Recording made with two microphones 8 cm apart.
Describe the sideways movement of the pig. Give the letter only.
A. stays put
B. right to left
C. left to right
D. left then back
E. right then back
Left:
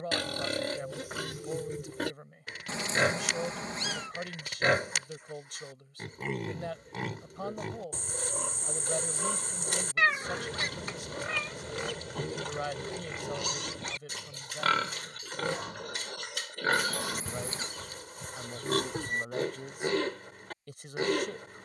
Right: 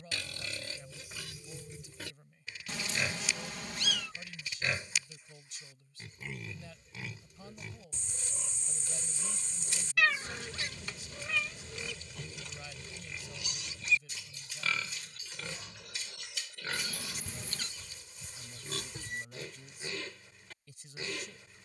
A.